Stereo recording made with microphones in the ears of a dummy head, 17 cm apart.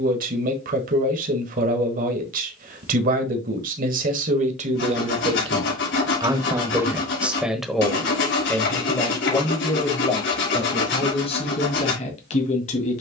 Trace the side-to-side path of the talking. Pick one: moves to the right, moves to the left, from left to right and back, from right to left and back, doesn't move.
moves to the left.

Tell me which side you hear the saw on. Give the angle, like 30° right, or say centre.
60° left.